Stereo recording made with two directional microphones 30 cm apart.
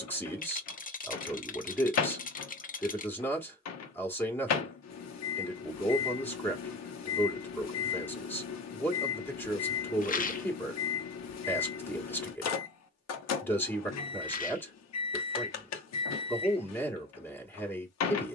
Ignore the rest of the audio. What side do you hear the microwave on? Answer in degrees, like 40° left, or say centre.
60° left.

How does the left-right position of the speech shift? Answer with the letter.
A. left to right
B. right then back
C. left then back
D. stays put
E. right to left
D.